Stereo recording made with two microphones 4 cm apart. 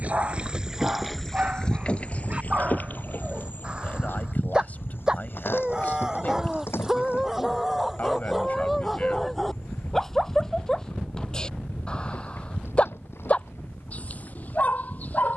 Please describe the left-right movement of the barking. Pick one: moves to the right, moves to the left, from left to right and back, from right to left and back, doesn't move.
moves to the left.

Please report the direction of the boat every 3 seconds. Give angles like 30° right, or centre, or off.
10° left, 60° left, 70° left, 80° left, 80° left.